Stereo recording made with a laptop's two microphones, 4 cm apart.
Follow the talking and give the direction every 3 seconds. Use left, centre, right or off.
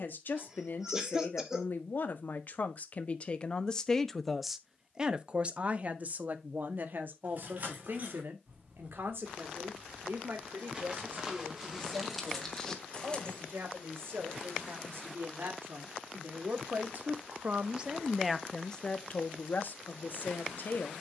left, centre, right, right, right, right, left.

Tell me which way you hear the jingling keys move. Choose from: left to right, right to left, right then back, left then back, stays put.
right to left.